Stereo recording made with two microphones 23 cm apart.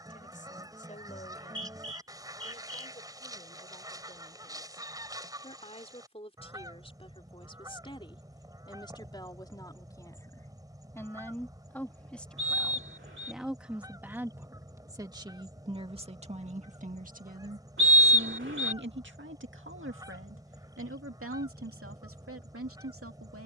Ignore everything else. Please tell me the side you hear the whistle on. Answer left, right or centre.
right.